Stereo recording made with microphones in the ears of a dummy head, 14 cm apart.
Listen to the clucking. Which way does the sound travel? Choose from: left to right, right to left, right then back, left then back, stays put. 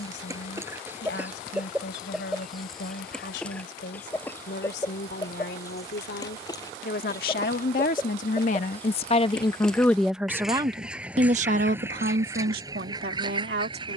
left then back.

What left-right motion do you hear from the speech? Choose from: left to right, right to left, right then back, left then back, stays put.
left to right.